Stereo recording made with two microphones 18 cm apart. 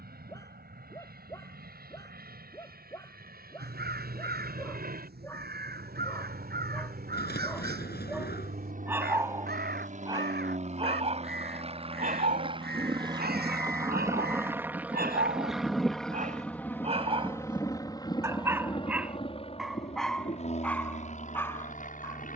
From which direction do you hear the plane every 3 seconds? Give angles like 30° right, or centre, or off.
70° right, 70° right, 60° right, 50° right, 20° right, 10° left, 30° left, 40° left.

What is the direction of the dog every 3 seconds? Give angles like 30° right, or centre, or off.
20° left, 20° left, centre, 30° right, 60° right, 40° right, centre, 10° left.